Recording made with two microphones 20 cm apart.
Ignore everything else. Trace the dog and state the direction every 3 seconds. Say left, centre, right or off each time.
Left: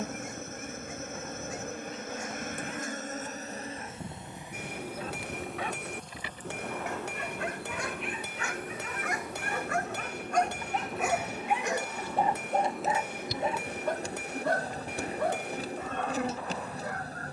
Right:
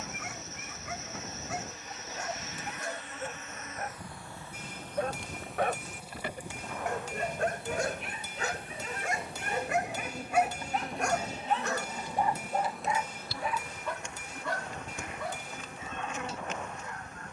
right, right, right, centre, left, left.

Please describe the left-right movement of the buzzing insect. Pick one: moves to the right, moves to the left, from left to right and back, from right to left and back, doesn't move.
from left to right and back.